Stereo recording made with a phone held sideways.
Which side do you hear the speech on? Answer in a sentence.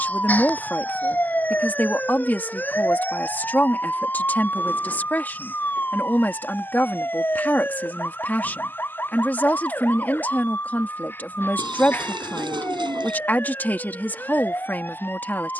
In this clip you hear the speech in the centre.